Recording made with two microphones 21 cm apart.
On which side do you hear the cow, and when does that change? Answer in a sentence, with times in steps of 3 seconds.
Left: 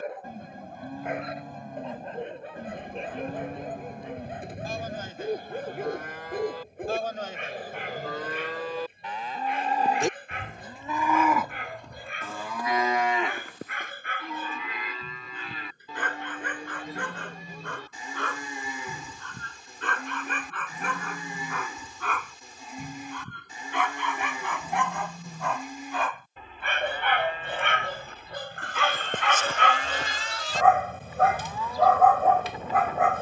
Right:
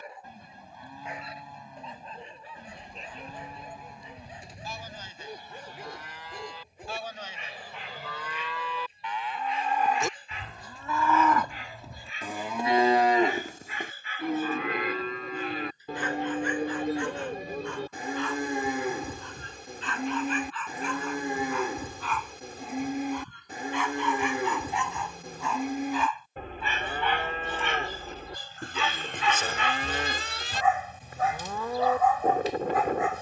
In this clip you hear the cow on the left from 0 s and on the right from 12 s.